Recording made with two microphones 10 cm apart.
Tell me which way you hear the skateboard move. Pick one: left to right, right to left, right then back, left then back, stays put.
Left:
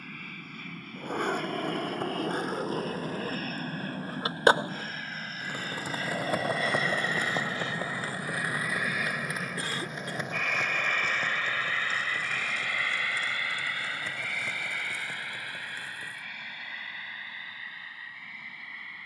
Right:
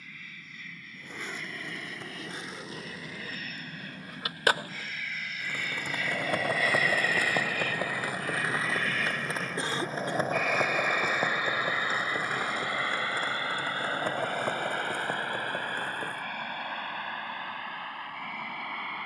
left to right.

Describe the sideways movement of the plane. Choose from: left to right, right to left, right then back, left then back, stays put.
left to right.